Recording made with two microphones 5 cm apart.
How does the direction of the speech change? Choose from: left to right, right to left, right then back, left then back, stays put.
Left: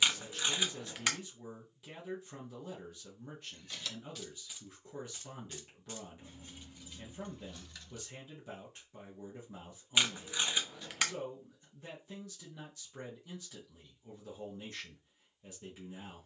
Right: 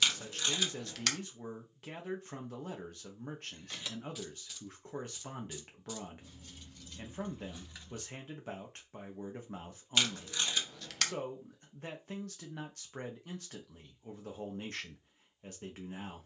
stays put.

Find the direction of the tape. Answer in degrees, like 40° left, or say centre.
20° left.